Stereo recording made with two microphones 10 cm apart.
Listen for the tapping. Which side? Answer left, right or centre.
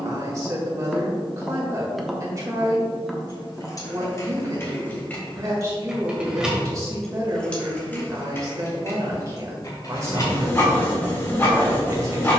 centre.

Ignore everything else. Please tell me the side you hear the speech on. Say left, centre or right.
right.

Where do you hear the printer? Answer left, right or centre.
left.